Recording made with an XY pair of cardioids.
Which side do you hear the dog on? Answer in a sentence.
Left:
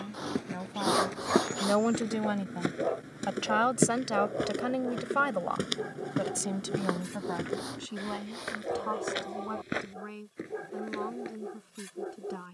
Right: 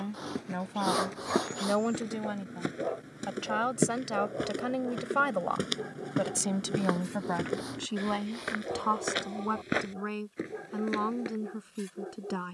In this clip you hear the dog on the left.